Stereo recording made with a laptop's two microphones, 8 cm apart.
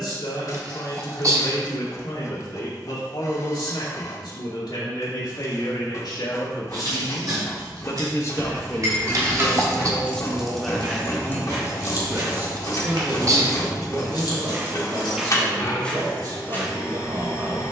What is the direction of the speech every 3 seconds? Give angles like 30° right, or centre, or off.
70° left, 70° left, 50° left, centre, 40° right, 50° right.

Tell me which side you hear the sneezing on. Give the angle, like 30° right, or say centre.
40° right.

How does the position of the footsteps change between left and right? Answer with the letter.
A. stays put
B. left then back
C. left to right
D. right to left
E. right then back
D.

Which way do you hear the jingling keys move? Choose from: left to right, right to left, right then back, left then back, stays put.
right to left.